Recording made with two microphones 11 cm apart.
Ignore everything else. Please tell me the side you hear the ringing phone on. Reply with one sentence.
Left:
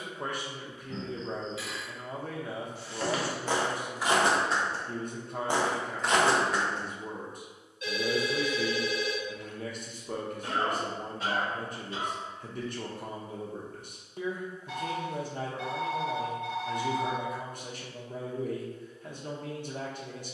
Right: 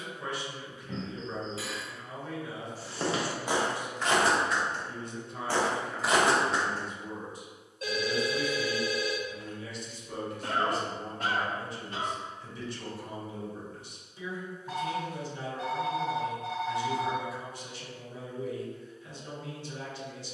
In this clip you hear the ringing phone on the right.